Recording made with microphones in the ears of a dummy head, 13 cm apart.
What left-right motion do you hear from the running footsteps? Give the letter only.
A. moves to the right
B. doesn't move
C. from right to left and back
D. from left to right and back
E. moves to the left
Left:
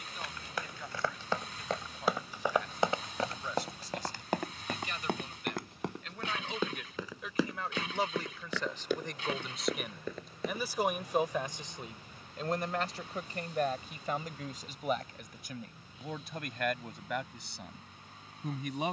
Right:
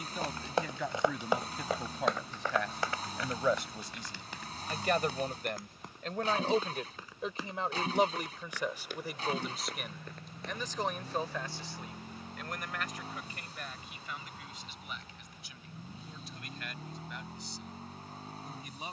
E.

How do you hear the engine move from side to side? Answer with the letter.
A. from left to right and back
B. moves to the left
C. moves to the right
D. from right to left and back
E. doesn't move
E.